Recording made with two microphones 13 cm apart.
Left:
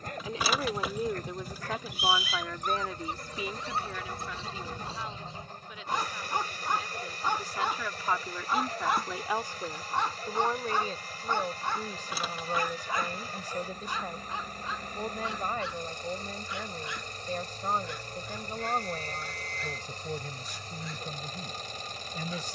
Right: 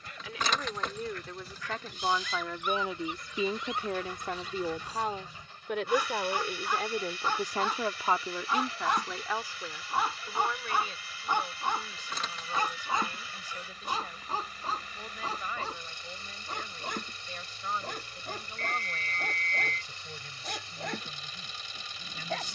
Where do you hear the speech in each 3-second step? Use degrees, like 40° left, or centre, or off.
10° left, 50° right, 40° right, 30° left, 40° left, 40° left, 40° left, 40° left.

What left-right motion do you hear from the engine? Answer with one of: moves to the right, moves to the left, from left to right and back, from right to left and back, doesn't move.
doesn't move.